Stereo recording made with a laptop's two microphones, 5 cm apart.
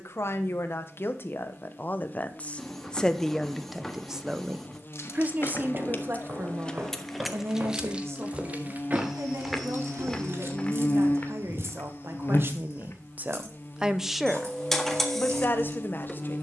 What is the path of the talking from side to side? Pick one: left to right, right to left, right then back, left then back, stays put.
right then back.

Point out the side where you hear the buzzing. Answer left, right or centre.
left.